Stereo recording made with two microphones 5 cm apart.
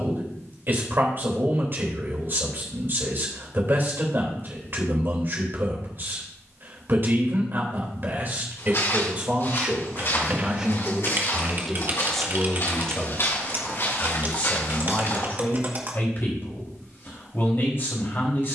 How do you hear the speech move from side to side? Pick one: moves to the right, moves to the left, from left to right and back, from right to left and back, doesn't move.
moves to the left.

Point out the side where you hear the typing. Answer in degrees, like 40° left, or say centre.
40° right.